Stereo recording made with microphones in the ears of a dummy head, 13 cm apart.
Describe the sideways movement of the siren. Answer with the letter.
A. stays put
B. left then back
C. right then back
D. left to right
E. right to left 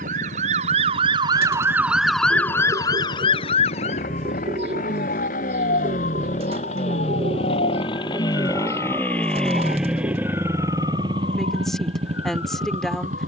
E.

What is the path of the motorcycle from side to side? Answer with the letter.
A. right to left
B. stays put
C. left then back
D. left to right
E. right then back
D.